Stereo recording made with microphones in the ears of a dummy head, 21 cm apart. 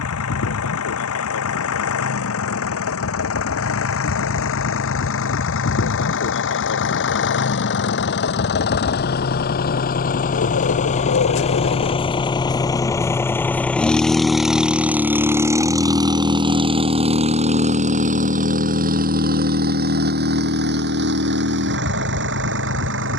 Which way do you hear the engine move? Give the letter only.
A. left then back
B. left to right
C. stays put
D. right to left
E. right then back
B.